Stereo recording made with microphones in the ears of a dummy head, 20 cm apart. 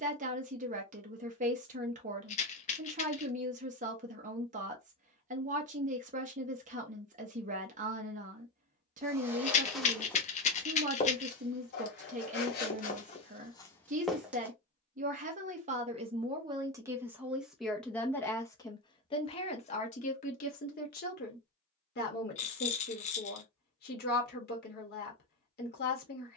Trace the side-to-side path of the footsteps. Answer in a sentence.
In this clip you hear the footsteps move from right to left and back again.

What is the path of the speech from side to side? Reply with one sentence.
In this clip you hear the speech move from right to left.